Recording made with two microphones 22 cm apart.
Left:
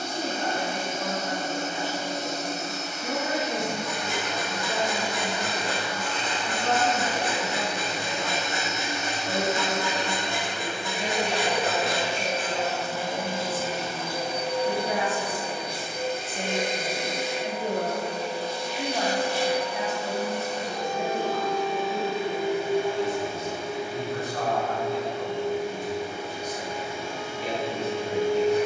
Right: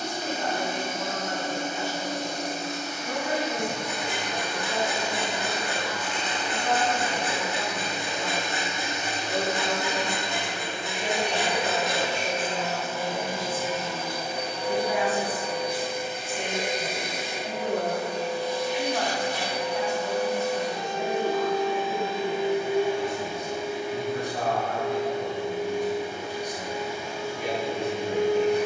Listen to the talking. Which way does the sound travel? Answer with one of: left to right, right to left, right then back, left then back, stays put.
left to right.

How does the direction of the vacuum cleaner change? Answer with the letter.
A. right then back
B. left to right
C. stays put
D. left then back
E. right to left
C.